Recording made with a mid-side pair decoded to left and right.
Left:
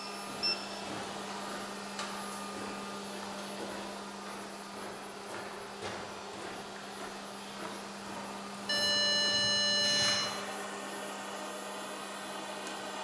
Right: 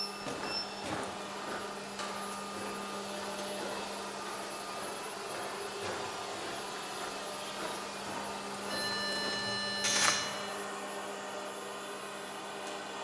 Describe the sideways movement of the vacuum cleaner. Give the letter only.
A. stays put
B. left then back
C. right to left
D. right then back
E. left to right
D.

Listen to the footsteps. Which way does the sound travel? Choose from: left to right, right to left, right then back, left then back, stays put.
left then back.